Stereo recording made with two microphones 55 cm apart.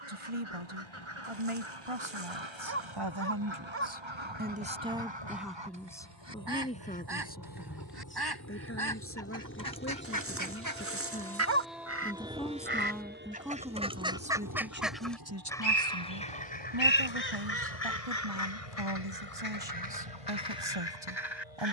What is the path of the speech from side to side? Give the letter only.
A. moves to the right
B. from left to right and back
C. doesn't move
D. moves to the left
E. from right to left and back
E.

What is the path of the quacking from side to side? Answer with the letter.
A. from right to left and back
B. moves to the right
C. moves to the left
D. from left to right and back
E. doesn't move
C.